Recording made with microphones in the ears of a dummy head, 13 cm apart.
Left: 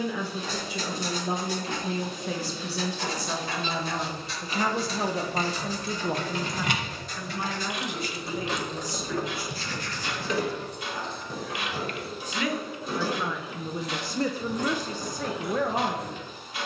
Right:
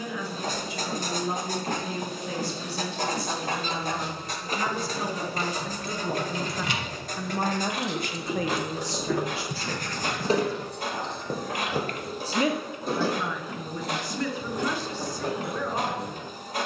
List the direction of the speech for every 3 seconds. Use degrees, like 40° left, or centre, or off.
60° left, 50° left, 30° right, 60° right, 10° left, 50° left.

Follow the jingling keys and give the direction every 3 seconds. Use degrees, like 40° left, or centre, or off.
off, 70° left, 20° left, 30° right, 50° right, 50° right.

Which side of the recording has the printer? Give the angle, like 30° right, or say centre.
40° right.